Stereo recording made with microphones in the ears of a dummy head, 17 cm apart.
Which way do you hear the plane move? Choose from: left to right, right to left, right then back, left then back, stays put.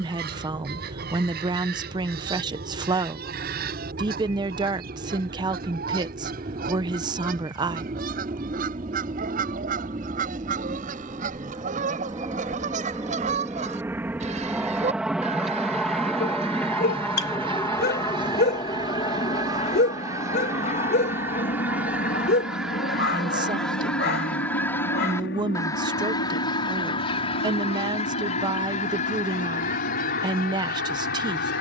right to left.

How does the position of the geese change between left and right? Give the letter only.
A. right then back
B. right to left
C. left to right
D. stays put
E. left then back
B.